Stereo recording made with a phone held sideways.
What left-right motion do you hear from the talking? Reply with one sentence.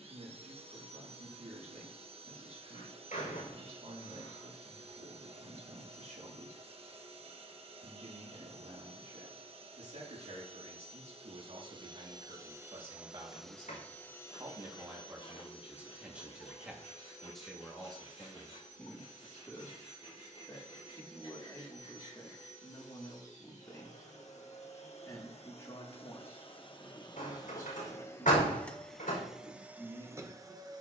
You can hear the talking move from right to left.